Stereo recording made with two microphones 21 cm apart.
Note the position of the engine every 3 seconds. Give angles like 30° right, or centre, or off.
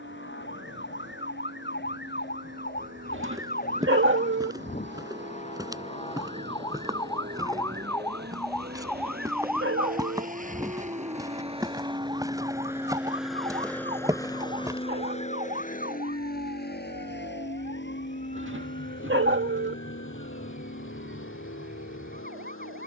70° right, 60° right, 60° right, 40° right, centre, 50° left, 70° left, 80° left.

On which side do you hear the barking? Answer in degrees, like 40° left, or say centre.
70° right.